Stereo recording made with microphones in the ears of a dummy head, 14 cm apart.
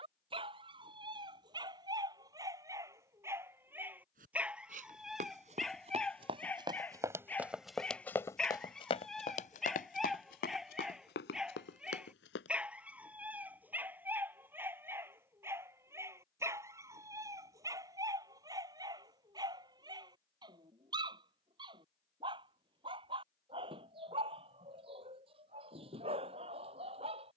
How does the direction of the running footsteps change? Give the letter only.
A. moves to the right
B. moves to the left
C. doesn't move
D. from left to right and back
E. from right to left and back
B.